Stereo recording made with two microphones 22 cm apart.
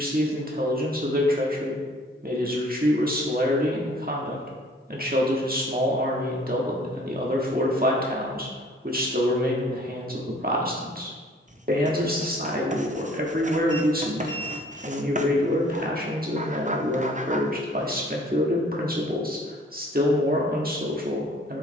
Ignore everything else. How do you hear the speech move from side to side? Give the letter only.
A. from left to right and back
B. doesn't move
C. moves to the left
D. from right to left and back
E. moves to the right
B.